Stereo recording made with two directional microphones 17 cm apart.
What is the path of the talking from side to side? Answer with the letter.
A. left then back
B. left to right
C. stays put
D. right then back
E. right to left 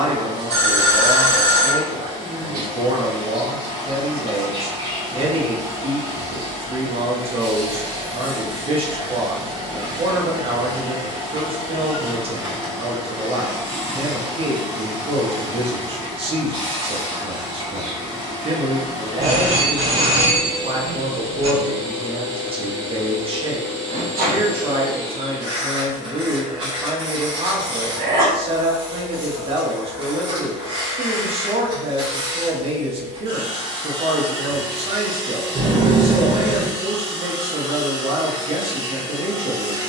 C.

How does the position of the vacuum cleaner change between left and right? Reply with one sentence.
In this clip you hear the vacuum cleaner stay put.